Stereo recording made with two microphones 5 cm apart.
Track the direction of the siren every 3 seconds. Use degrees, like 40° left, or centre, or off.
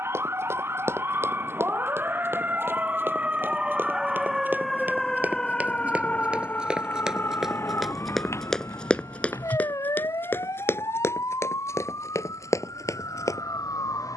40° right, centre, 40° left, 70° left, 80° left.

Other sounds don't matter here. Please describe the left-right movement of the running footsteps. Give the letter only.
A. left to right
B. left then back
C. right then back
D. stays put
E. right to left
E.